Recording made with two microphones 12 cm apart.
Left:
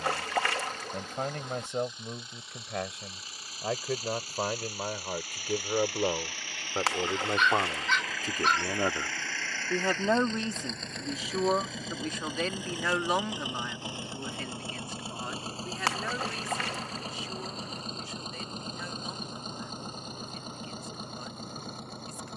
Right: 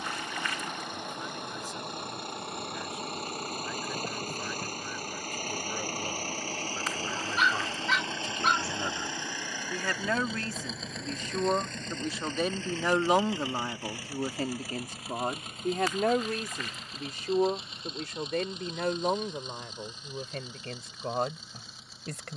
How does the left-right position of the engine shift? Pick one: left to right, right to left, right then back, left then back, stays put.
right to left.